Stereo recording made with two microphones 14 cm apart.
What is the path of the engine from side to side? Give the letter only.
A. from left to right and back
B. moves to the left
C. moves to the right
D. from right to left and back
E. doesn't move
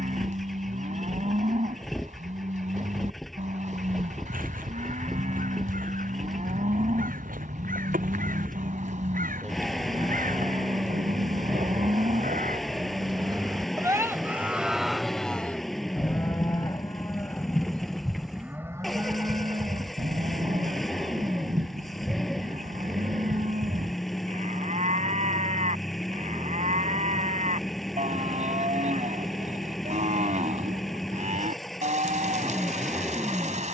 E.